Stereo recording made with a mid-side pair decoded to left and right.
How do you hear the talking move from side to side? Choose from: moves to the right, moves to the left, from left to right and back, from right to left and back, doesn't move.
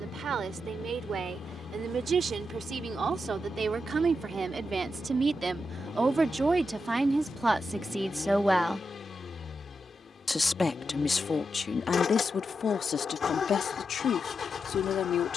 moves to the left.